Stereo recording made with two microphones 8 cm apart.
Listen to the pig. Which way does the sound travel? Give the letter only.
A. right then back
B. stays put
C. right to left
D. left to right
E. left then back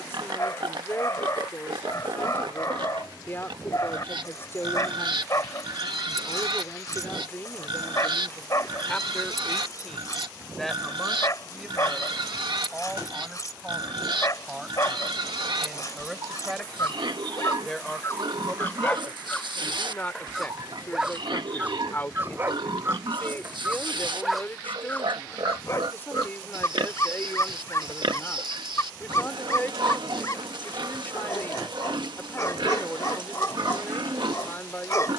B.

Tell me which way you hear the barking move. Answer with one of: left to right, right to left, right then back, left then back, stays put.
right then back.